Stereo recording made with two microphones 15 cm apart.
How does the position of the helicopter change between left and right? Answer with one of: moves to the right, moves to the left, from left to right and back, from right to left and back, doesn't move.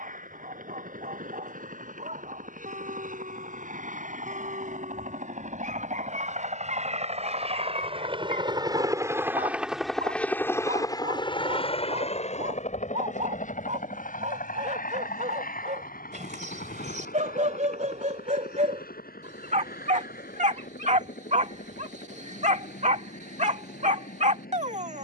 moves to the left.